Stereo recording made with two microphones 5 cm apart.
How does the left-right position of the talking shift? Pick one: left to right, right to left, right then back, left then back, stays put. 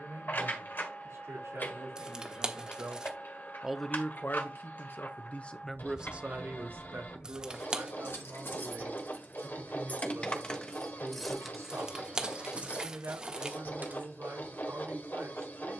left then back.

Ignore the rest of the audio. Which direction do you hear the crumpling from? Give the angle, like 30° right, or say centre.
20° right.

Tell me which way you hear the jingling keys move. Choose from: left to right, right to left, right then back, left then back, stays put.
left to right.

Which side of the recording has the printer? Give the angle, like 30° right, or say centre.
50° left.